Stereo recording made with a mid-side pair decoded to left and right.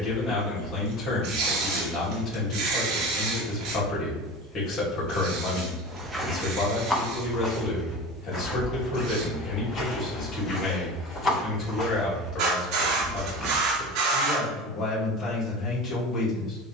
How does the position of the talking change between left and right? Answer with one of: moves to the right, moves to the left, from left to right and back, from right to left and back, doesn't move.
doesn't move.